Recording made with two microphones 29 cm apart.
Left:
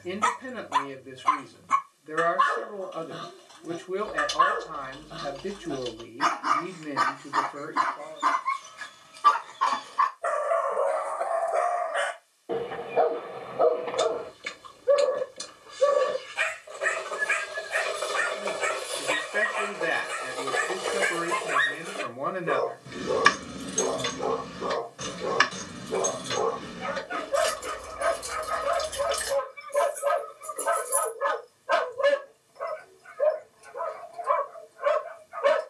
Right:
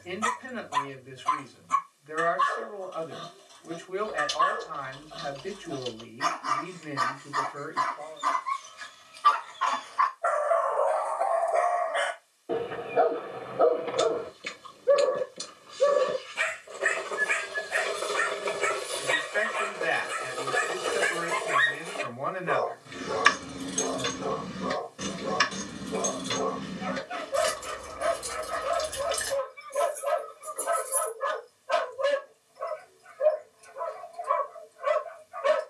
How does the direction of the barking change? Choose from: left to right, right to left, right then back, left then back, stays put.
right then back.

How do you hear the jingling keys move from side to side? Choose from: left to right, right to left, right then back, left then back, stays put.
right then back.